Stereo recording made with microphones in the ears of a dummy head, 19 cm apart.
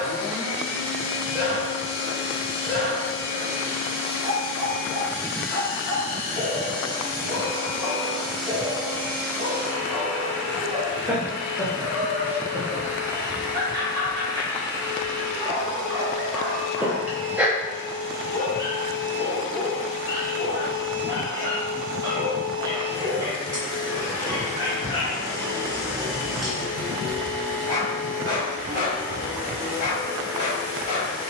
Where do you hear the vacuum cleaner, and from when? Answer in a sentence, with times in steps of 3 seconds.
You can hear the vacuum cleaner on the left from 0 s and in the centre from 6 s.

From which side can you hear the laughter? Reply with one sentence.
You can hear the laughter in the centre.